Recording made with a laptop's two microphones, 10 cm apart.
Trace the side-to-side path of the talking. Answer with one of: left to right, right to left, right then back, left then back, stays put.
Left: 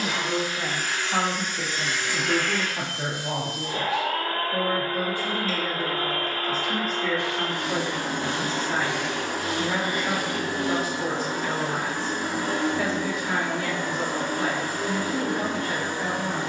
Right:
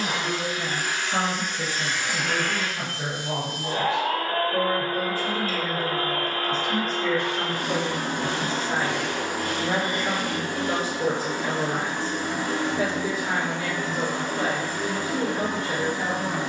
left to right.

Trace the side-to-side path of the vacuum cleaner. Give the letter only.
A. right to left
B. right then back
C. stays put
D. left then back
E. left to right
A.